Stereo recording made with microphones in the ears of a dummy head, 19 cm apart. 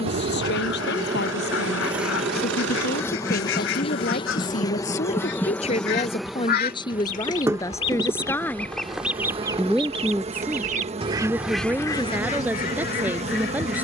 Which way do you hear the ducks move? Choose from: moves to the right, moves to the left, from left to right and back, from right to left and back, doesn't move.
from left to right and back.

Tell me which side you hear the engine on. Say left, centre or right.
right.